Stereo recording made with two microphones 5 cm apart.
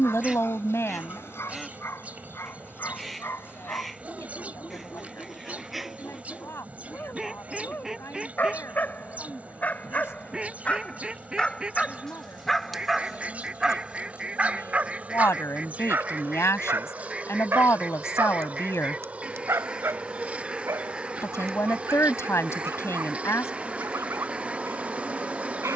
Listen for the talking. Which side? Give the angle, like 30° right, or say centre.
70° left.